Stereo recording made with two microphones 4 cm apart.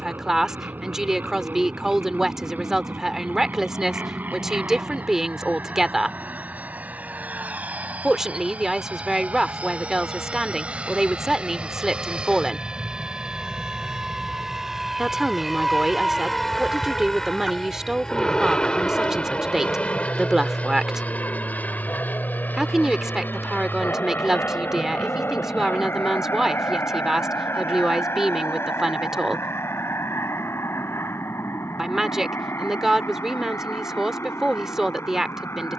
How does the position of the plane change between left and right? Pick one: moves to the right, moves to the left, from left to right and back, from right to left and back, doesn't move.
moves to the left.